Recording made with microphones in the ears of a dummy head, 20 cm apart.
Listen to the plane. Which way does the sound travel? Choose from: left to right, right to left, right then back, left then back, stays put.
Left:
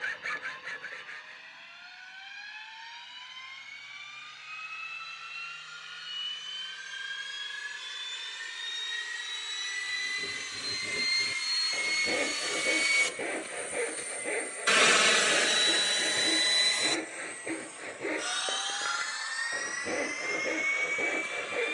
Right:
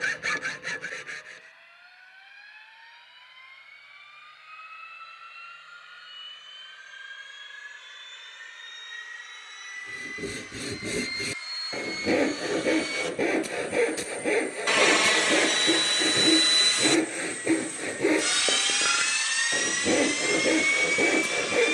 left to right.